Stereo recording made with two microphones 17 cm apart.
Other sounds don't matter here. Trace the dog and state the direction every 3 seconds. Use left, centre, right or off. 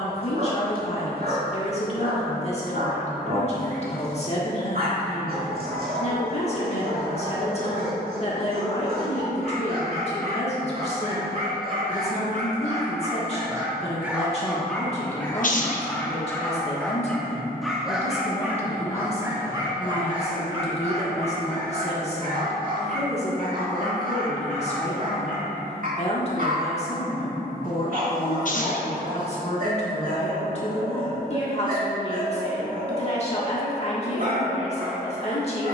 right, right, right, right, right, centre, right, right, right, right, right, right.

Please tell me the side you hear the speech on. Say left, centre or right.
left.